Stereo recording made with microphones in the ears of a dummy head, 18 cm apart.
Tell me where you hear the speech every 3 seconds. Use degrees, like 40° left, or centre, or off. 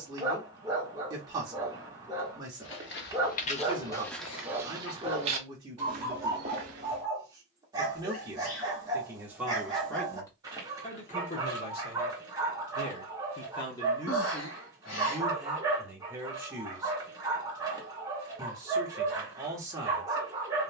20° right, 20° right, 20° right, 20° left, 20° left, 10° right, 20° right.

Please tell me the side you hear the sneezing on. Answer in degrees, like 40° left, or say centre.
70° left.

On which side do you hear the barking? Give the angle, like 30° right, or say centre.
20° right.